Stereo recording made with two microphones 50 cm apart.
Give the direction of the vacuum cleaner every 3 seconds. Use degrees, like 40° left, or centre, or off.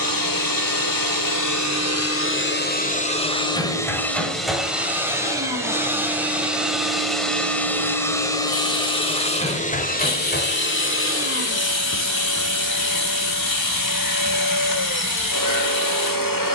40° left, centre, centre, 20° left, 40° left, 40° left.